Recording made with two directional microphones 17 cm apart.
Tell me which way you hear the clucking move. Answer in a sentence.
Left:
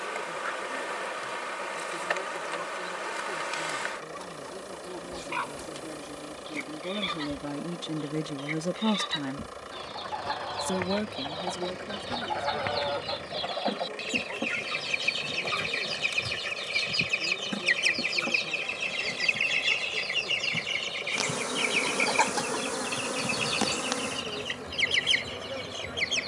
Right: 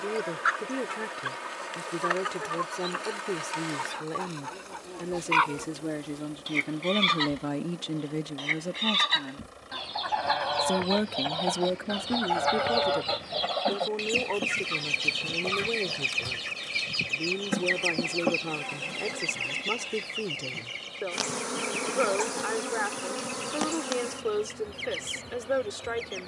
You can hear the clucking move from right to left.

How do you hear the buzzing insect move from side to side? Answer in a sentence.
You can hear the buzzing insect go right and come back.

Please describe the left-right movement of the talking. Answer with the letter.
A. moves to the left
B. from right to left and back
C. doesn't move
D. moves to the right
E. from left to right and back
B.